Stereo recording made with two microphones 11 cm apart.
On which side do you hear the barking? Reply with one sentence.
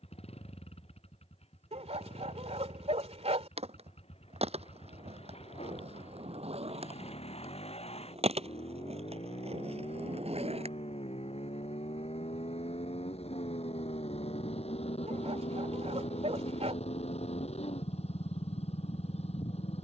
You can hear the barking on the right.